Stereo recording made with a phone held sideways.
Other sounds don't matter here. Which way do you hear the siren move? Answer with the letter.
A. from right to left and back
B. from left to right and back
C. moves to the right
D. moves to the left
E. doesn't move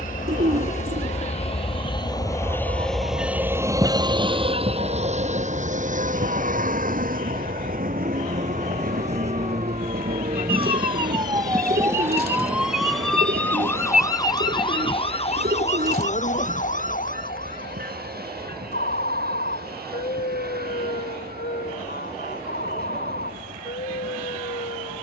D.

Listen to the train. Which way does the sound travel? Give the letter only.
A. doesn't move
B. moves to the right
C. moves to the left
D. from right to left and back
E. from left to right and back
B.